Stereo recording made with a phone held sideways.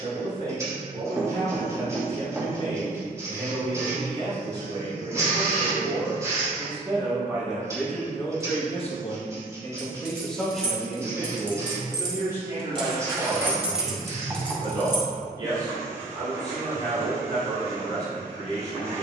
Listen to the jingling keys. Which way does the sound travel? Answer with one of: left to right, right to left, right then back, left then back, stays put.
right to left.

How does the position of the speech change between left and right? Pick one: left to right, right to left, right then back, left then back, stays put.
left then back.